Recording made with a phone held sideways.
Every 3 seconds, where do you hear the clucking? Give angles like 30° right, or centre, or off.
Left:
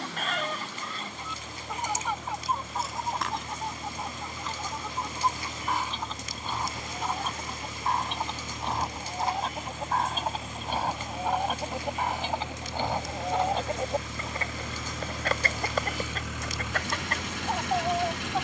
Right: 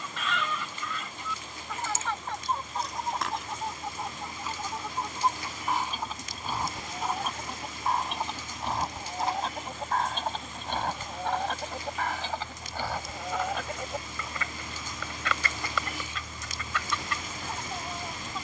20° left, 10° right, centre, 10° left, 30° left, 50° left.